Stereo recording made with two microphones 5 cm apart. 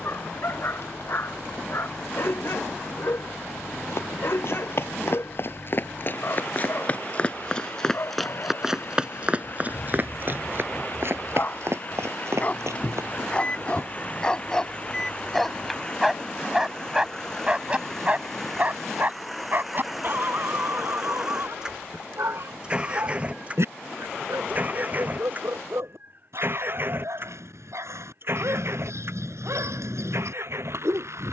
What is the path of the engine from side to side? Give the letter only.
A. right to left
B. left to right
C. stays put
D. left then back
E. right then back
B.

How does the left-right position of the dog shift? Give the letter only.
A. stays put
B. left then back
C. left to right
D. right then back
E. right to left
C.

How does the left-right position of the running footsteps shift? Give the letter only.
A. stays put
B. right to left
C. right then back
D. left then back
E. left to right
E.